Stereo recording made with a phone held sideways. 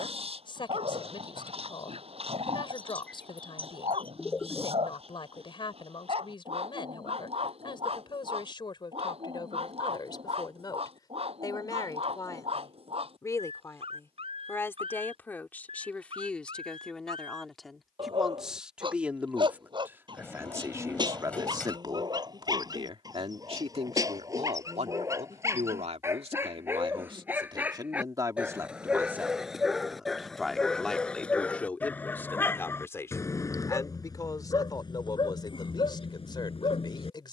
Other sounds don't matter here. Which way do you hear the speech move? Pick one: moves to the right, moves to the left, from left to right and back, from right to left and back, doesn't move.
from left to right and back.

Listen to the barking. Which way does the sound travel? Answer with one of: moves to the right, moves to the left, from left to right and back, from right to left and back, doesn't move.
moves to the left.